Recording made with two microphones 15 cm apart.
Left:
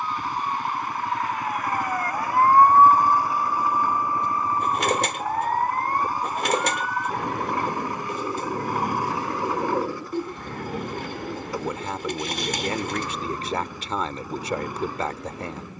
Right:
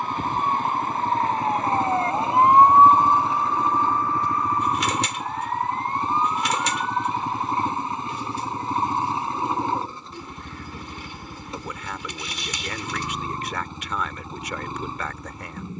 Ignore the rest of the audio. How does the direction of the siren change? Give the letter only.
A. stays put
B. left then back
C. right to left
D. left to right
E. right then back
C.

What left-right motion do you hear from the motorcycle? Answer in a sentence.
In this clip you hear the motorcycle stay in one place.